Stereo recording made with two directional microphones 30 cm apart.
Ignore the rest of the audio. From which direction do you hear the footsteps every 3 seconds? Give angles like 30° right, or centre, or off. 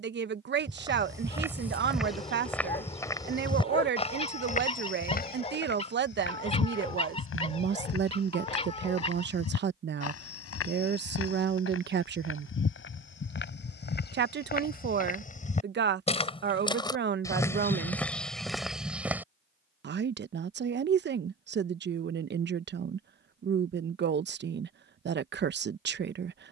centre, 20° left, 50° left, 50° left, 40° left, 20° left, centre, off, off.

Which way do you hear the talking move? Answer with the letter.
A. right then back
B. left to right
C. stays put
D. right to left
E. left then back
C.